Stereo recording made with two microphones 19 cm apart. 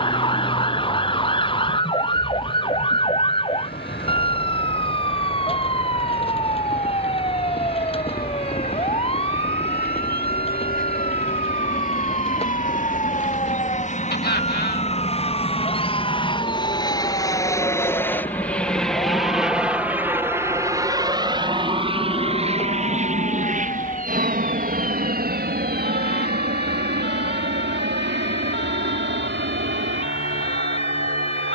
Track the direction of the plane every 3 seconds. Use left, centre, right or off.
left, left, left, left, left, left, centre, right, right, right, right.